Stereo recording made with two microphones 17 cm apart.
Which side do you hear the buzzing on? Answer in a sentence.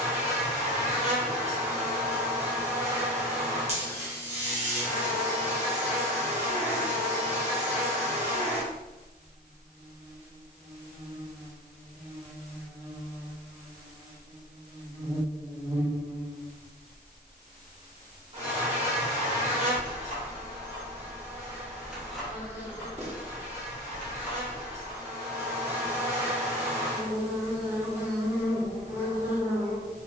You can hear the buzzing on the right.